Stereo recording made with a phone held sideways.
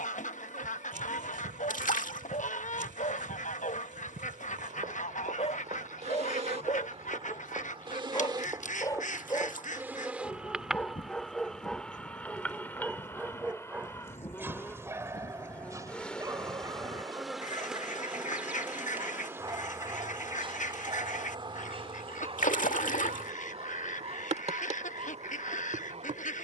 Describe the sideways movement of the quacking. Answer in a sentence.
You can hear the quacking stay in one place.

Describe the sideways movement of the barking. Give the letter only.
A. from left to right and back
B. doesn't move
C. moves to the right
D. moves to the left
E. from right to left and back
C.